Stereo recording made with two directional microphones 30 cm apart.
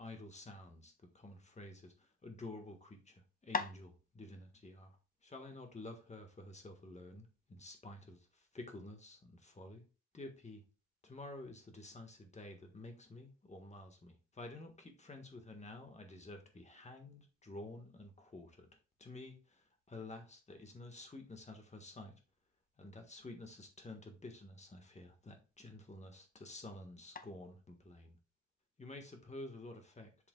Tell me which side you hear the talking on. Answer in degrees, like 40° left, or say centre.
20° left.